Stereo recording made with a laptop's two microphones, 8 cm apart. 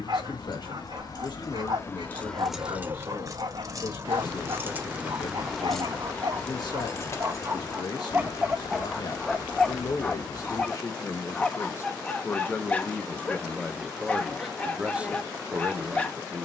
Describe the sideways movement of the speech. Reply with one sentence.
You can hear the speech move from left to right.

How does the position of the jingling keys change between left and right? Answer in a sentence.
You can hear the jingling keys move from left to right and back again.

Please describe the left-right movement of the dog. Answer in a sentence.
In this clip you hear the dog travel towards the left.